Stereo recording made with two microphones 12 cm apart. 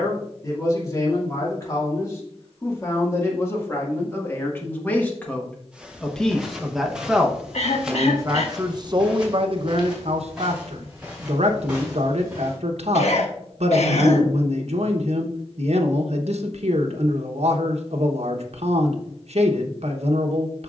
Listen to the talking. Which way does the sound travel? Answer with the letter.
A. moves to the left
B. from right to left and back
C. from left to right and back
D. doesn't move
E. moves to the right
E.